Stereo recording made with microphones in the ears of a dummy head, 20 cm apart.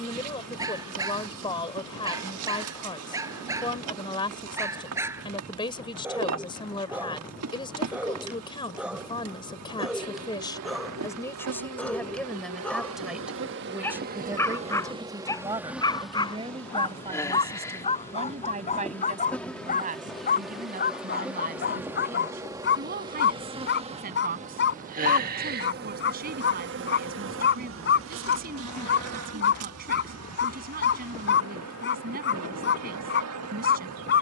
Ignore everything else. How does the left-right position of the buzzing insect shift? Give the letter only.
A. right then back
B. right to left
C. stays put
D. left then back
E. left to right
D.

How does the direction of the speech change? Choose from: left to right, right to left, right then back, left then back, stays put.
left to right.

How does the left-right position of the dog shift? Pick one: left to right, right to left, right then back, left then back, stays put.
right to left.